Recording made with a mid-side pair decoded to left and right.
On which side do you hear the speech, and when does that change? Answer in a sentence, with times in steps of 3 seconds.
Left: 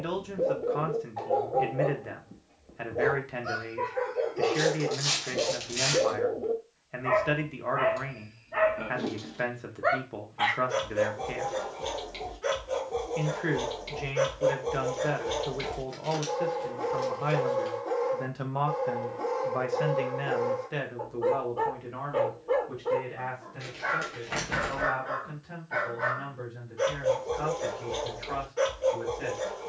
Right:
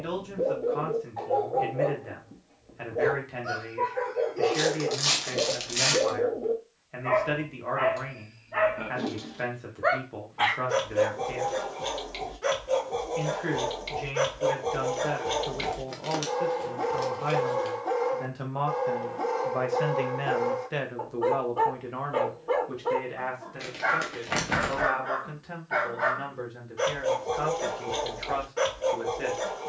In this clip you hear the speech on the left from 0 s, in the centre from 18 s and on the right from 21 s.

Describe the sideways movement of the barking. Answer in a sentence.
In this clip you hear the barking move from left to right.